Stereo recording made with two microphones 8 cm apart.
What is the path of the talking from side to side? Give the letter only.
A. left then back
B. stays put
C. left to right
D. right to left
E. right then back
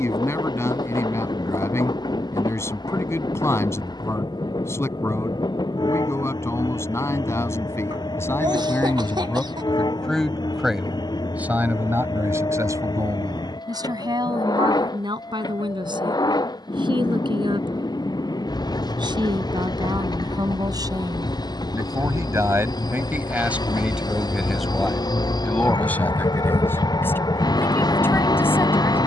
E.